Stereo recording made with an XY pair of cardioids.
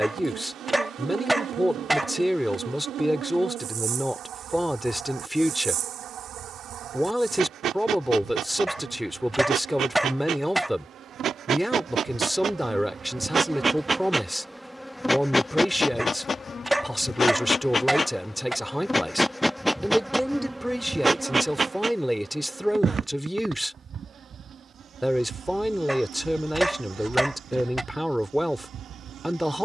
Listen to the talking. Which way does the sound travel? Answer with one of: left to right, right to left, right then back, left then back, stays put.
stays put.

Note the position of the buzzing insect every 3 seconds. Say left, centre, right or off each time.
right, right, right, right, right, left, centre, right, right, right.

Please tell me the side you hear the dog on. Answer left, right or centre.
centre.